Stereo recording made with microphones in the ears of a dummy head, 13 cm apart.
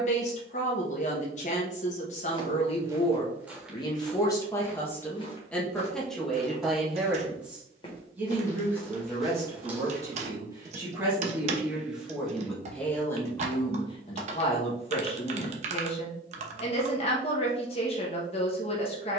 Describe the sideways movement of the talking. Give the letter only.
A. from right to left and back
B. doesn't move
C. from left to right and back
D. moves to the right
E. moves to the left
C.